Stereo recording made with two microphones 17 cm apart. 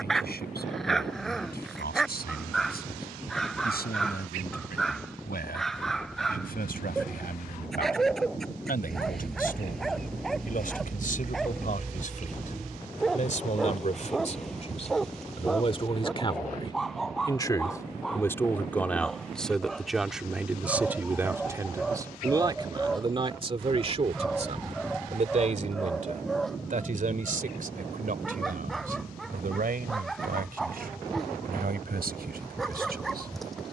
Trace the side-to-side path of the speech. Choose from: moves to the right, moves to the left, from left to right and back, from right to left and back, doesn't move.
moves to the right.